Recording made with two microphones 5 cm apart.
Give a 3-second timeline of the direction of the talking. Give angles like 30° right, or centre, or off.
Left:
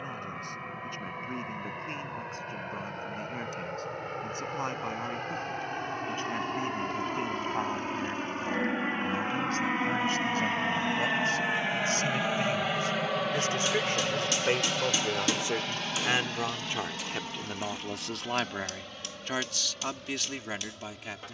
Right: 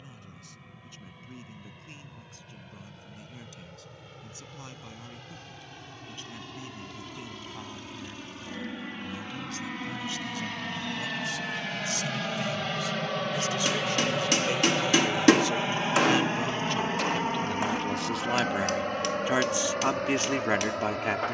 60° left, 50° left, 50° left, 50° left, 40° left, 20° left, 20° right.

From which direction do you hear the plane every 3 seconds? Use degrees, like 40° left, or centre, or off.
60° left, 60° left, 50° left, 30° left, centre, 30° right, 50° right.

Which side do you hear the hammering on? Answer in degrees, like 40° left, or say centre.
60° right.